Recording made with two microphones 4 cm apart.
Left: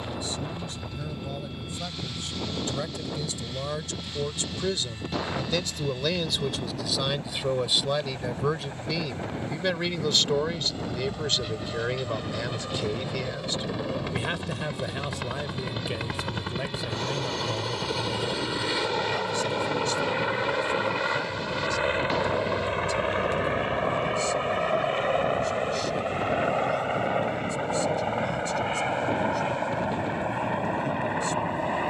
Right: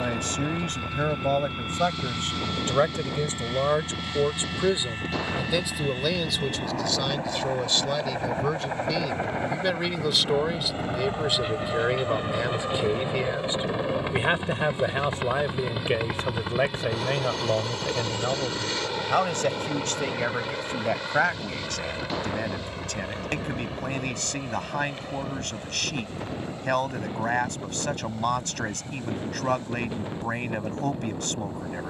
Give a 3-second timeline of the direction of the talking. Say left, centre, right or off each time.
right, right, centre, centre, right, right, right, right, right, right, right.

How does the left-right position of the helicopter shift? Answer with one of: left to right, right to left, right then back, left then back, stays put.
right to left.